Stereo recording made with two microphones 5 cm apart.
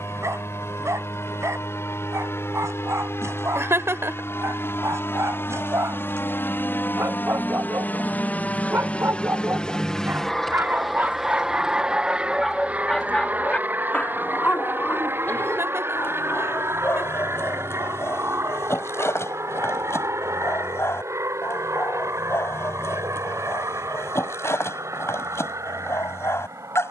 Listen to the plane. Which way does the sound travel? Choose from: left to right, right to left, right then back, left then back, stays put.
left to right.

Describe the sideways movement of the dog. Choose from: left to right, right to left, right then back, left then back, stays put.
right to left.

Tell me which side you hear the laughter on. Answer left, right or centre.
right.